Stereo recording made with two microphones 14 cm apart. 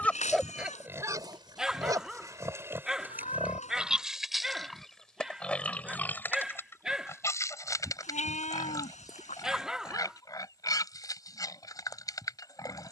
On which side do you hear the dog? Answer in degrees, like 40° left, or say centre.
centre.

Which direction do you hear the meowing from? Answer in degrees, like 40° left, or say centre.
50° left.